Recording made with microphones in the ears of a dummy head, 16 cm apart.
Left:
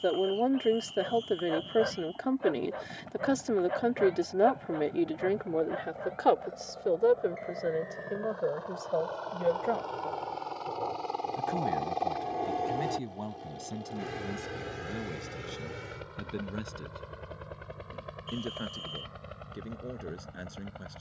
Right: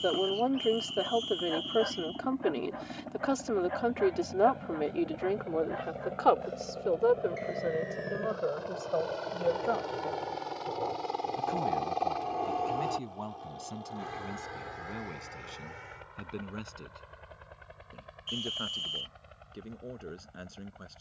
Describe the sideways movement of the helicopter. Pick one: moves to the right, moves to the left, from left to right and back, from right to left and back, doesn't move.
moves to the left.